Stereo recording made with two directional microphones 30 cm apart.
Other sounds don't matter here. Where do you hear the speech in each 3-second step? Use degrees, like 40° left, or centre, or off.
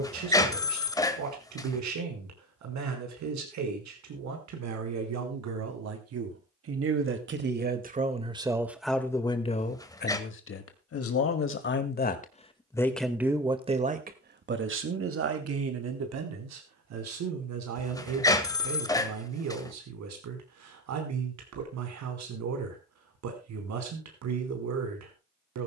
70° right, 60° right, 30° right, 30° left, 10° right, 60° right, 60° right, 60° right, 60° right.